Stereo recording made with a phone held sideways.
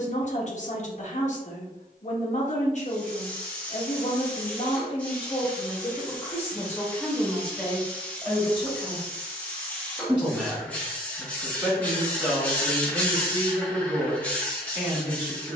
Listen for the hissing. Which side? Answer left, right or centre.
centre.